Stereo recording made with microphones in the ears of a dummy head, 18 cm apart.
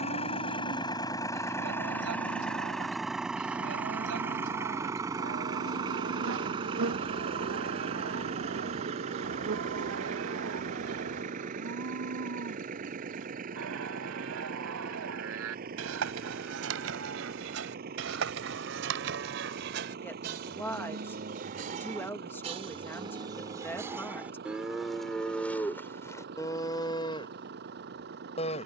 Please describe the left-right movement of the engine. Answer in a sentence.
You can hear the engine move to the right.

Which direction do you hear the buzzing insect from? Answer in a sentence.
In this clip you hear the buzzing insect on the right.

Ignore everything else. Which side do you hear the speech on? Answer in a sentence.
In this clip you hear the speech in the centre.